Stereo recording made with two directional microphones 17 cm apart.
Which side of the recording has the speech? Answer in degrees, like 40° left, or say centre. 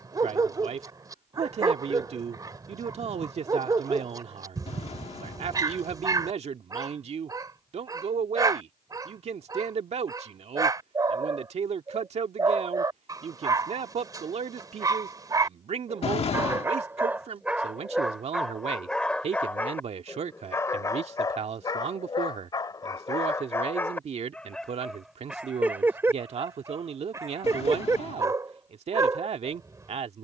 40° right.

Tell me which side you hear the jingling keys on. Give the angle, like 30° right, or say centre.
40° left.